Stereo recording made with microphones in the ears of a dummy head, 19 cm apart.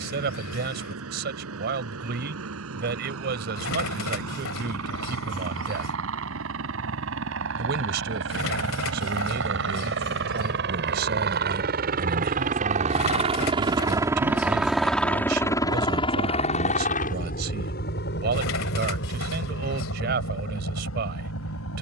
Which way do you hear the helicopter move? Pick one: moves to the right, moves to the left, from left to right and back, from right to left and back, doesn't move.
moves to the left.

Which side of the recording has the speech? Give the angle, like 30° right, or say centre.
50° right.